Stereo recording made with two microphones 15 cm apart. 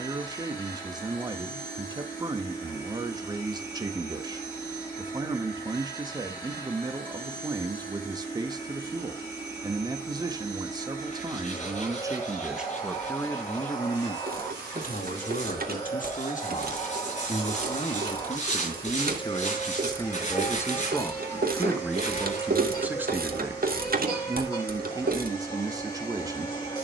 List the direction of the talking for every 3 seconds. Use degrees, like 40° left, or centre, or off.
30° right, 30° right, 30° right, 30° right, 20° left, 50° left, 30° left, 10° right, 20° right.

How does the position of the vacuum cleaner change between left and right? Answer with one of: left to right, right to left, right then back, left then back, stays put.
stays put.